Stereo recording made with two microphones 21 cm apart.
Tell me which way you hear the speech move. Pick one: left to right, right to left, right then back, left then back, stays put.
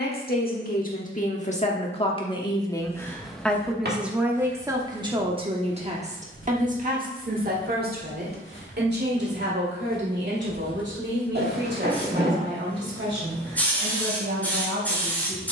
left to right.